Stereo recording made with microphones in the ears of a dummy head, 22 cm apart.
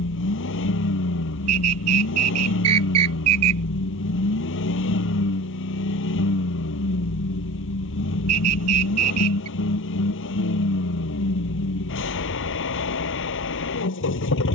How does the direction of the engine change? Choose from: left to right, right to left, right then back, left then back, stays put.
stays put.